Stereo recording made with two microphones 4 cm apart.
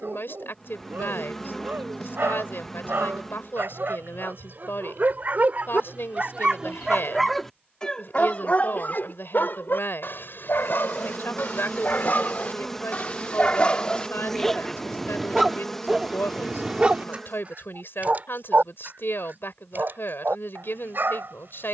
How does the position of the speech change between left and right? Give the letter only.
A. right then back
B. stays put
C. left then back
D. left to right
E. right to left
B.